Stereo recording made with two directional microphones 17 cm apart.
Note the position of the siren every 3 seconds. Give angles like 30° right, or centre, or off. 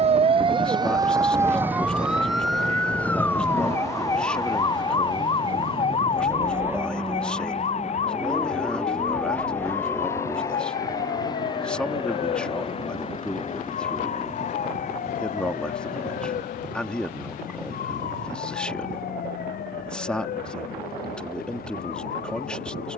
10° right, 20° left, 40° left, 50° left, 50° left, 50° left, 60° left, 60° left.